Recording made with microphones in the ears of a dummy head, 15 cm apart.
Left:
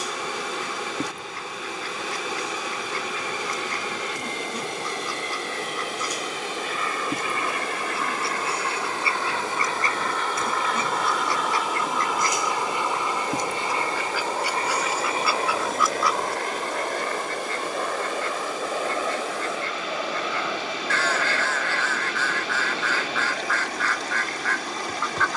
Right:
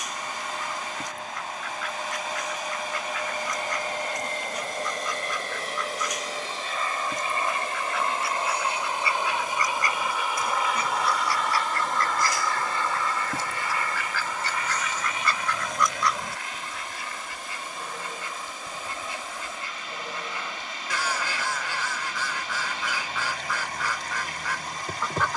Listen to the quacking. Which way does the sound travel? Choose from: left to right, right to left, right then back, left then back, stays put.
left to right.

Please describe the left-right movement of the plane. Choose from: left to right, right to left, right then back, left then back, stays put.
right to left.